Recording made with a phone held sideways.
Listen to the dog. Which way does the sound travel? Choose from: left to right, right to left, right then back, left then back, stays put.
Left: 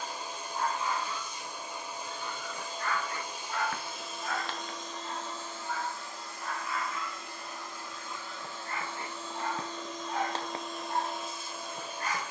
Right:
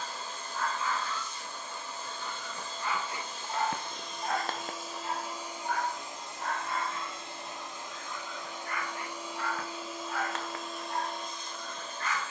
right then back.